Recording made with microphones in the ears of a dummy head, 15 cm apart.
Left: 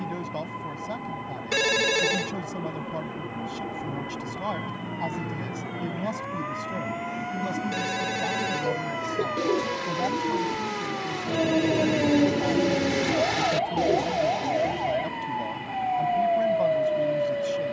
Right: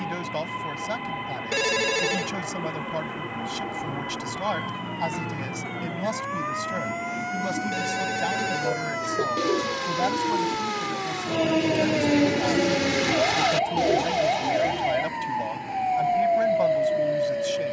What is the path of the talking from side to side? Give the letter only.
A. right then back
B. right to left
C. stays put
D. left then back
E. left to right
C.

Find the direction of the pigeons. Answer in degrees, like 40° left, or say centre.
20° right.